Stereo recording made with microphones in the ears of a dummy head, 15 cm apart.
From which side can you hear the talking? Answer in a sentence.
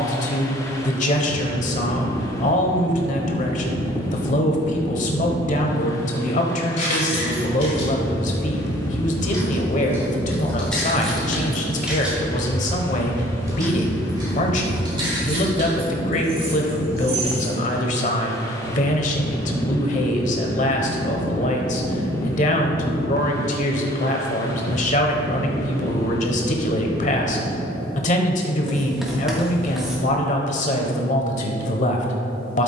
In this clip you hear the talking on the left.